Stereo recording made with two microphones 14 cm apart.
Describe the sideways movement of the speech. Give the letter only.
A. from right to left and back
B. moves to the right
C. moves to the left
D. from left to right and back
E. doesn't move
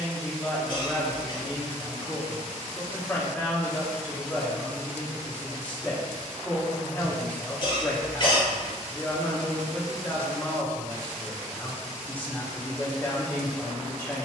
E.